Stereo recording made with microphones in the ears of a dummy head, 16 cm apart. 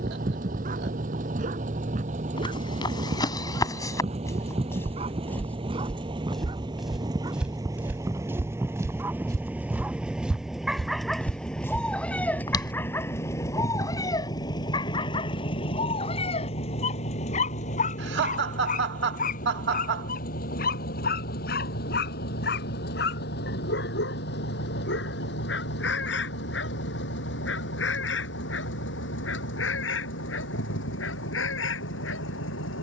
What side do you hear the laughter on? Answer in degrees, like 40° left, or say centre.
60° right.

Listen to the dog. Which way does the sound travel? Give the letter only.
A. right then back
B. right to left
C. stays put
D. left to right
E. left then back
B.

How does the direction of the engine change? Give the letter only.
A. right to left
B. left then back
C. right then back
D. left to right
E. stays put
A.